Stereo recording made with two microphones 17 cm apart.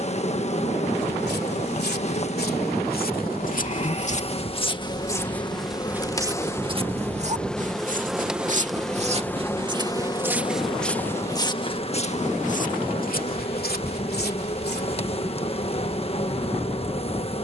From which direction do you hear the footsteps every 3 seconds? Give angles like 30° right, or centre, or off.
70° left, 30° left, 40° right, centre, 60° left, off.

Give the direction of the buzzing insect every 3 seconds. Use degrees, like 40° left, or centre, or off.
40° left, 30° left, 10° left, 30° left, 40° left, 40° left.